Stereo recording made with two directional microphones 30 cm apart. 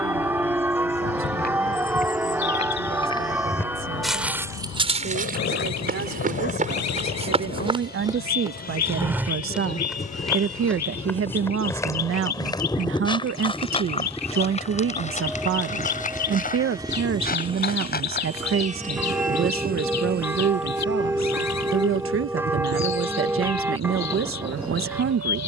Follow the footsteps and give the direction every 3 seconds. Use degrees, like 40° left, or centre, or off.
30° left, 10° right, 20° right, centre, 20° left, 30° left, 30° left, off, off.